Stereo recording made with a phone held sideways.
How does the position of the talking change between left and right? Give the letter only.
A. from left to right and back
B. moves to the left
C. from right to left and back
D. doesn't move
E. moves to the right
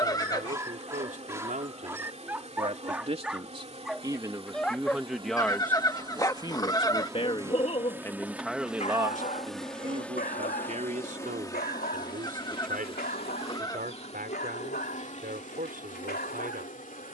C.